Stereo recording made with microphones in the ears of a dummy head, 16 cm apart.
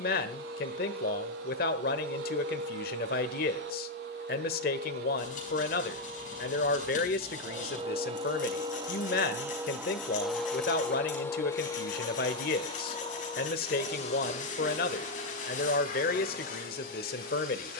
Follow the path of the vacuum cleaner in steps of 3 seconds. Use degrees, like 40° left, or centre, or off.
70° right, 60° right, 40° right, centre, 40° left, 50° left.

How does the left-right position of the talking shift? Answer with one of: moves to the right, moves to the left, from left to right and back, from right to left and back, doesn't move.
doesn't move.